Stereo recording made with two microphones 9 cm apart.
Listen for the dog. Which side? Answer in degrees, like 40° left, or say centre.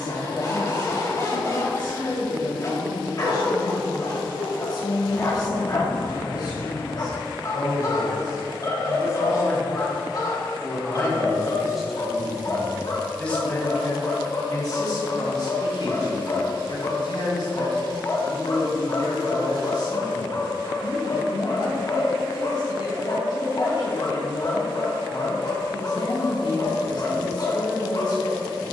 40° left.